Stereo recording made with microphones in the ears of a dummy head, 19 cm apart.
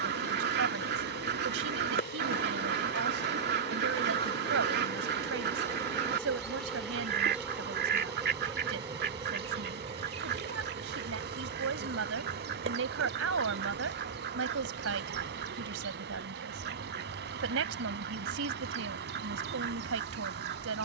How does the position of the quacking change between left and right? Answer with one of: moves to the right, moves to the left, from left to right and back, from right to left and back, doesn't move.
doesn't move.